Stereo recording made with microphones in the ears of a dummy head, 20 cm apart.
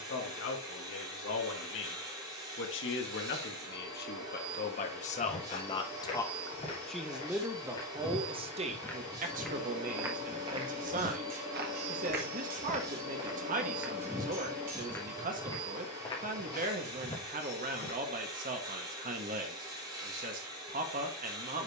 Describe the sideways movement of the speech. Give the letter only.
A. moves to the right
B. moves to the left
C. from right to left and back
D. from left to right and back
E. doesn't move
A.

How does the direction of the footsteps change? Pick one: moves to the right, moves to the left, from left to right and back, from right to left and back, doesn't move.
from left to right and back.